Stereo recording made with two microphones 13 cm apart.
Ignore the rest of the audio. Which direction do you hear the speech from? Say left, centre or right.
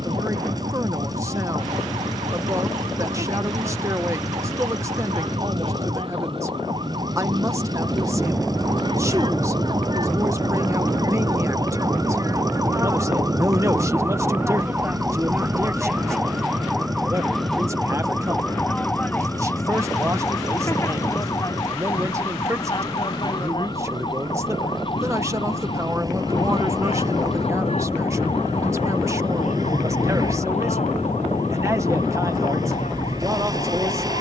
right.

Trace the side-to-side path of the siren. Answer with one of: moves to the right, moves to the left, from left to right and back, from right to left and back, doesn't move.
moves to the left.